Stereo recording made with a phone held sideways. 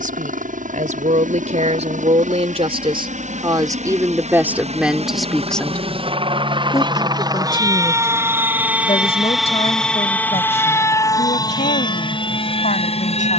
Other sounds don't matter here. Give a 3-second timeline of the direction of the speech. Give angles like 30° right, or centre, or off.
50° right, 10° right, 30° left, 50° left, 60° left.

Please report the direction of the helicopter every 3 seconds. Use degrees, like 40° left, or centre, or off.
60° right, 50° right, 20° right, 10° left, 40° left.